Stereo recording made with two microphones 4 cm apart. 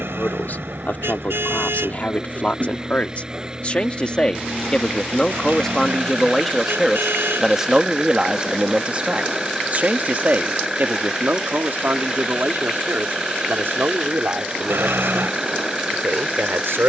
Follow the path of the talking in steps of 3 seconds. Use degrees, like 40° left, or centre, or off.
40° left, 20° left, 10° right, 50° right, 70° right, 70° right.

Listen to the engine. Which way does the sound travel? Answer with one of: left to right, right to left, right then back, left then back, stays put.
stays put.